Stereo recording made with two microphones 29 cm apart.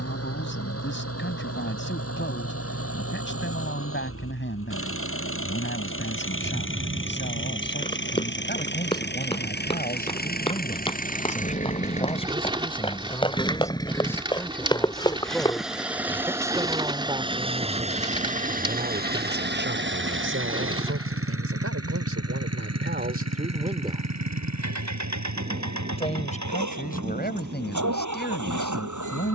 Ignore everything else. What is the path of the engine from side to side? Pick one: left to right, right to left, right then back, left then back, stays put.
left to right.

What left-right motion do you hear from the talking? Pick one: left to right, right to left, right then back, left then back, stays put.
right then back.